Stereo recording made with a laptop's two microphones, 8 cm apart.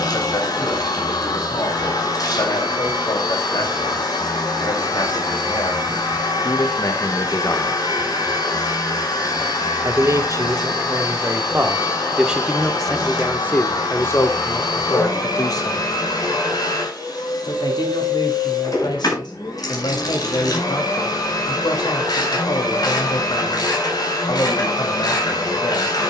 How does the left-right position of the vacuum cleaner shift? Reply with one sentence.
You can hear the vacuum cleaner stay put.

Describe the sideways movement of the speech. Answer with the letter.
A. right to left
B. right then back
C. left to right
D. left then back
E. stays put
B.